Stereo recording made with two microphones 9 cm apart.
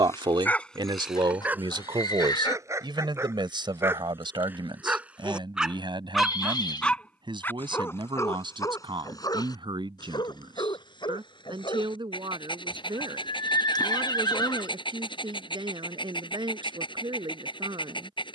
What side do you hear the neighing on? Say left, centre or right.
left.